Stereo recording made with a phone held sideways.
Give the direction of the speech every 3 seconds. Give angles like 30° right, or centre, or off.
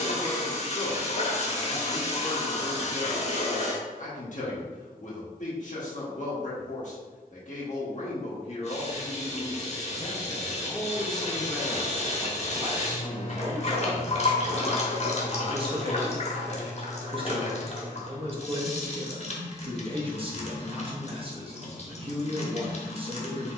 50° left, 50° left, 50° left, 20° left, 30° right, 30° right, 30° right, 30° right.